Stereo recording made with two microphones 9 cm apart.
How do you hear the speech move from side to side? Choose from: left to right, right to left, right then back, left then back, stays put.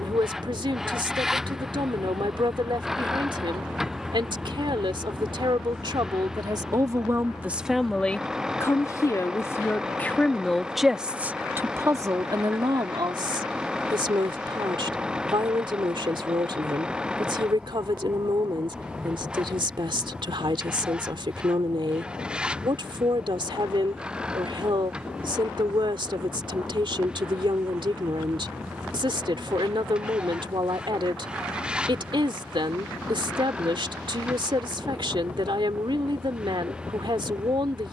left then back.